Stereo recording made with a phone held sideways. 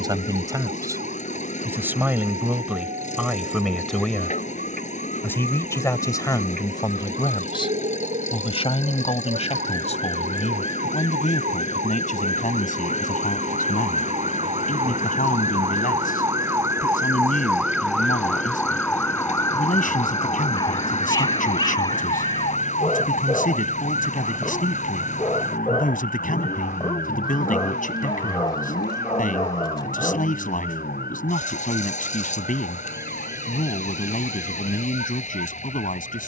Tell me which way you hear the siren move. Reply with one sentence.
You can hear the siren go from the right side to the left.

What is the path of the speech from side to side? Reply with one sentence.
In this clip you hear the speech go from the right side to the left.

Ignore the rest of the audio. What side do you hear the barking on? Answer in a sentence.
You can hear the barking on the left.